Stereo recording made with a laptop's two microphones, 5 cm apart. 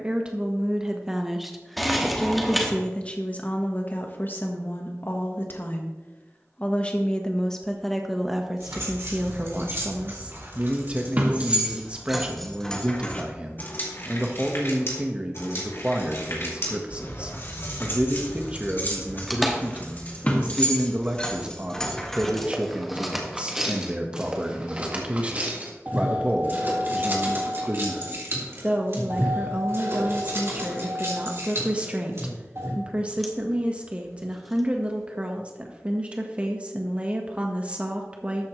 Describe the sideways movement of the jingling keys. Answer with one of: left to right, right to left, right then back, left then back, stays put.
left then back.